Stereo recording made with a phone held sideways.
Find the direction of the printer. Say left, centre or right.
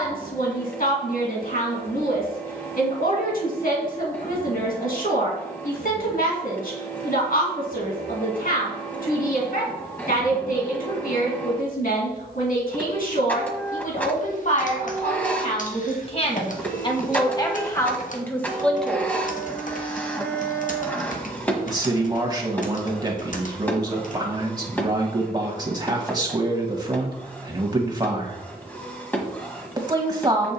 centre.